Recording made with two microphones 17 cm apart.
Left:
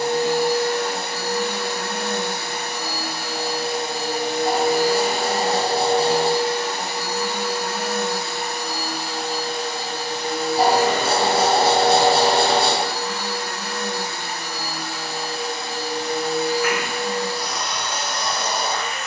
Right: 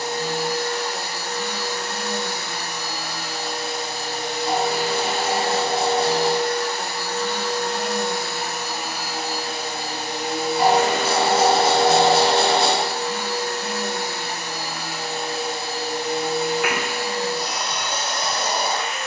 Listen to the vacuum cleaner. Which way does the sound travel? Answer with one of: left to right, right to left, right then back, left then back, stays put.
left to right.